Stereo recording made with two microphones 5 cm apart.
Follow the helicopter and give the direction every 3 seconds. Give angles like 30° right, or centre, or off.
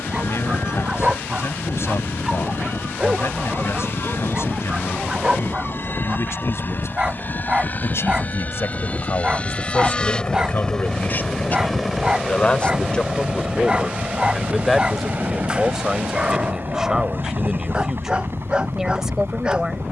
70° left, 60° left, 40° left, 20° left, 20° right, 50° right, 60° right.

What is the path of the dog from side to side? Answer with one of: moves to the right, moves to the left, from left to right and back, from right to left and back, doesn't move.
doesn't move.